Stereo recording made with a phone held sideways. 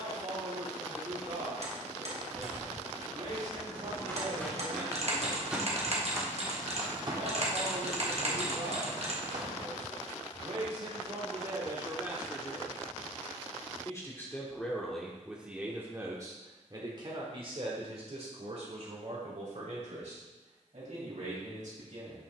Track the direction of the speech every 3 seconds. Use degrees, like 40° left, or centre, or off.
70° right, 70° right, 70° right, 50° right, 10° left, 30° right, 60° right, 70° right.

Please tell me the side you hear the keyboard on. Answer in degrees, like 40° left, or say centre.
50° right.